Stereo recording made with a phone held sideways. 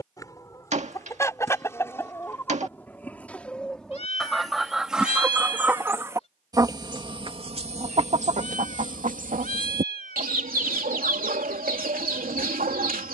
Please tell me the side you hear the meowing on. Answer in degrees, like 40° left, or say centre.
50° left.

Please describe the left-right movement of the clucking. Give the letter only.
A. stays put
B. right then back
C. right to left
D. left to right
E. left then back
D.